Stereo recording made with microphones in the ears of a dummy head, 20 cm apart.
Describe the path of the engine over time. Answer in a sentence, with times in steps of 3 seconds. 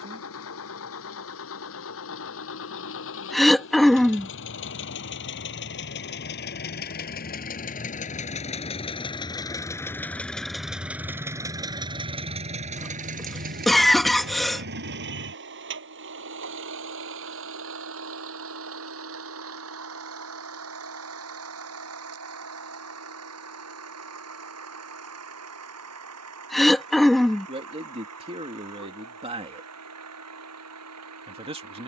In this clip you hear the engine on the left from 0 s, in the centre from 9 s and on the right from 12 s.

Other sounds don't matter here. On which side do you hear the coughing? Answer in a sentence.
In this clip you hear the coughing in the centre.